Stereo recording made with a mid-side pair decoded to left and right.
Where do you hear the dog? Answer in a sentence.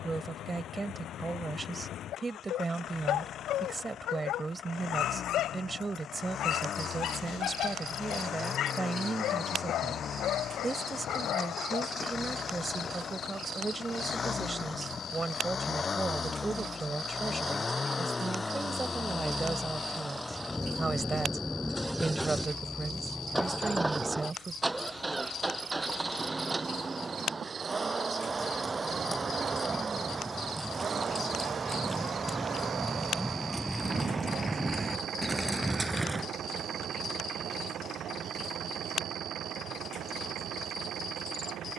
You can hear the dog on the left.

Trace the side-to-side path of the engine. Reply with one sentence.
You can hear the engine move from left to right.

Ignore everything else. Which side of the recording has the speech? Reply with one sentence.
In this clip you hear the speech on the right.